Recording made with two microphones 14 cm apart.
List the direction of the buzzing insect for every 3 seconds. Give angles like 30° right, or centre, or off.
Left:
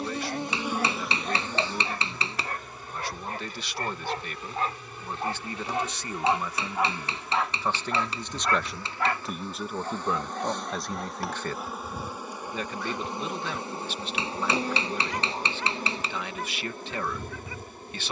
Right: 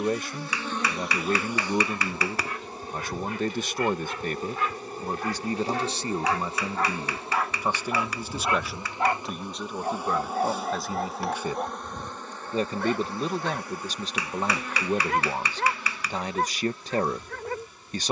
10° right, 40° right, 30° right, 10° right, 20° left, 50° left.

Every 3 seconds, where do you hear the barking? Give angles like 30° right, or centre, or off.
50° left, 40° left, centre, 40° right, 60° right, 60° right.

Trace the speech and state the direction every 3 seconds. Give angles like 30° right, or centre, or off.
50° right, 40° right, 20° right, centre, 40° right, 40° right.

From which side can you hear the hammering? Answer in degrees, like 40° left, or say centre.
30° left.